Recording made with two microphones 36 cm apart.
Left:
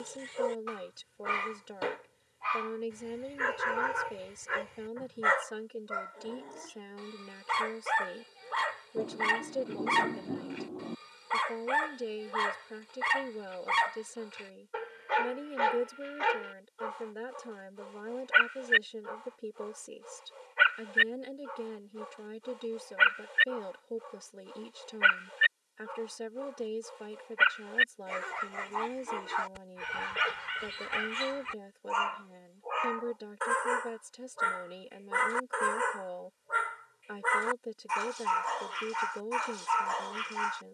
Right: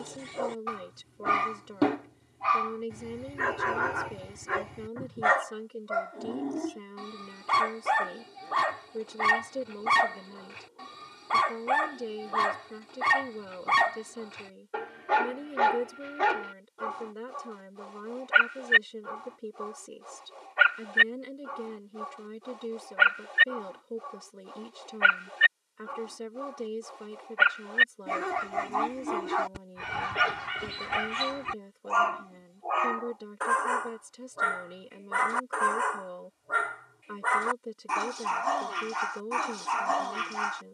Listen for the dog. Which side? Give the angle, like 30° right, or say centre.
80° right.